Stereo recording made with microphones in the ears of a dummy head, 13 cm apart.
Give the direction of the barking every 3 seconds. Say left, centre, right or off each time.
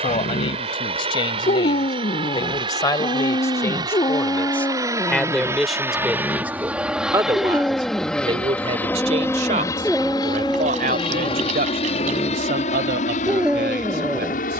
left, left, centre, centre, centre.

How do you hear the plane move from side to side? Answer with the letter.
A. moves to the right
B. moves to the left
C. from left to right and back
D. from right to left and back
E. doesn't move
B.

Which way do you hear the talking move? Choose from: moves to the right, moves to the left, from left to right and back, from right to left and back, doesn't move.
moves to the right.